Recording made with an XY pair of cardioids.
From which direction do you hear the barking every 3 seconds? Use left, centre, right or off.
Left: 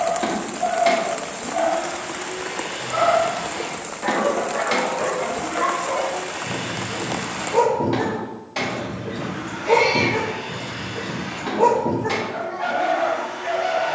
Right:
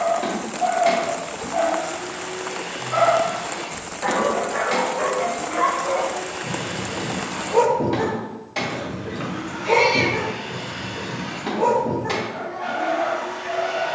right, right, centre, left, left.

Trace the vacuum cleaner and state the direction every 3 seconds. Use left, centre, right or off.
left, left, centre, centre, right.